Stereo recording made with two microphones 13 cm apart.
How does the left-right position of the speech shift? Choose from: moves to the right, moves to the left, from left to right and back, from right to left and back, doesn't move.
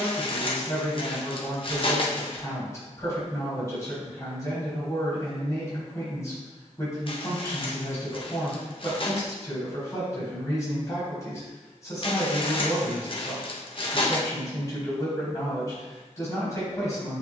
doesn't move.